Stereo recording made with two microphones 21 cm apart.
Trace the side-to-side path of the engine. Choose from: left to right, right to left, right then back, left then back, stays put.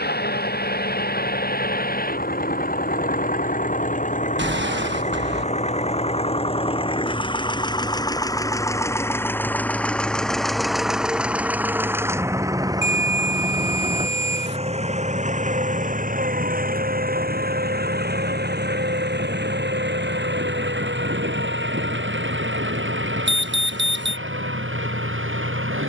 left to right.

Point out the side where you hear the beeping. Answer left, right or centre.
right.